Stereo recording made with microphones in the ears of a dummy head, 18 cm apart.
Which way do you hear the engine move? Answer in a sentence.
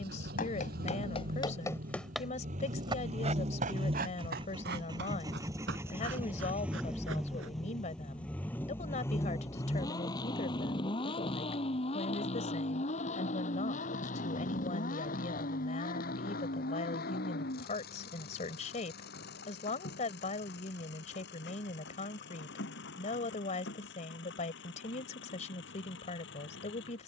You can hear the engine go from the right side to the left.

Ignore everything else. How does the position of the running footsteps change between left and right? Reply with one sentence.
In this clip you hear the running footsteps travel towards the right.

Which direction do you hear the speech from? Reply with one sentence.
In this clip you hear the speech on the left.